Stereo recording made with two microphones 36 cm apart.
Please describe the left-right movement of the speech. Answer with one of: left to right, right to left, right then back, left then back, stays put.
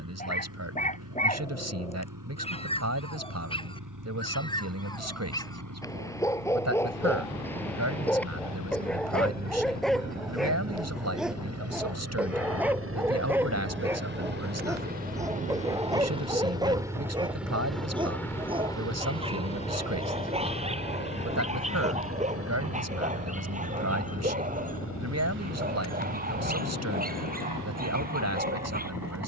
stays put.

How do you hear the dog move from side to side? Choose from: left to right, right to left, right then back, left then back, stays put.
left to right.